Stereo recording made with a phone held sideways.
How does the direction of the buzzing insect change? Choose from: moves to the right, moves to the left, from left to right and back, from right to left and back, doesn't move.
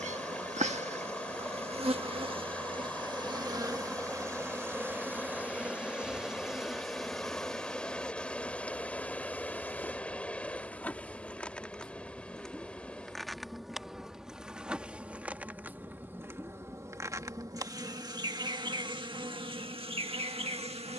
from right to left and back.